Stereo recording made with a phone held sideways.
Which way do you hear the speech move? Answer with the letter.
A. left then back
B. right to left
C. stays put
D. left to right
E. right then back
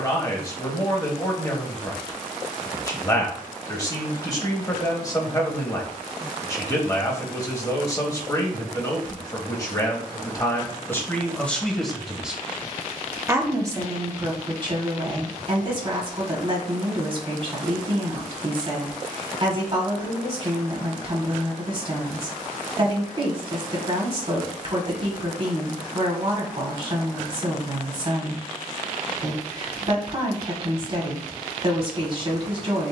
D.